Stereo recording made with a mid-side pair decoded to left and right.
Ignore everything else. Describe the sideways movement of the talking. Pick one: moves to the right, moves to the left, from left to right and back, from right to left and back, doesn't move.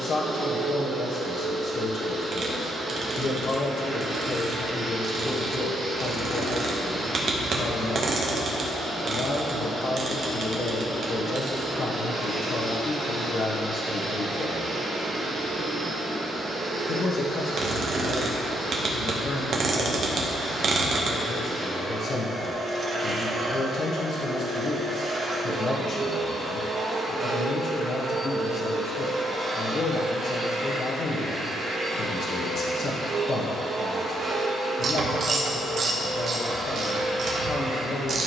doesn't move.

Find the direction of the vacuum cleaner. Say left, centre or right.
right.